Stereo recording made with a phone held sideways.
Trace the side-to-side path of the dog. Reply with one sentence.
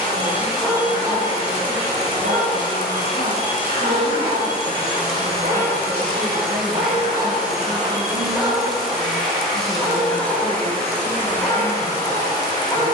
In this clip you hear the dog move from left to right and back again.